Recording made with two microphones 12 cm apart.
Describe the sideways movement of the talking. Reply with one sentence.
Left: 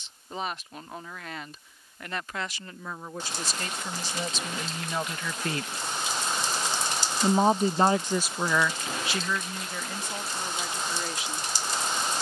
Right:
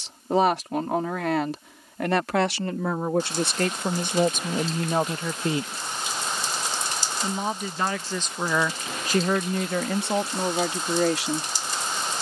You can hear the talking go left and come back.